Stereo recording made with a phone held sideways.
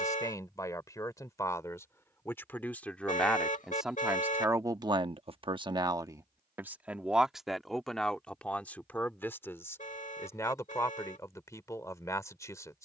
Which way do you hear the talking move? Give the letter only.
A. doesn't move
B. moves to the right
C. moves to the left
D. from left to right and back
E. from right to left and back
D.